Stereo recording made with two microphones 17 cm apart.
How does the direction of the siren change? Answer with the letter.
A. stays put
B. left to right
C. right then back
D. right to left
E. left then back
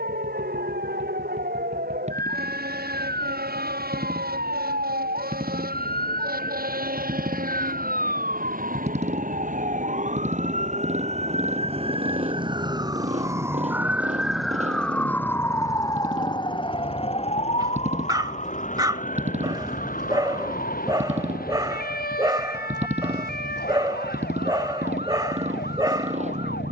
D.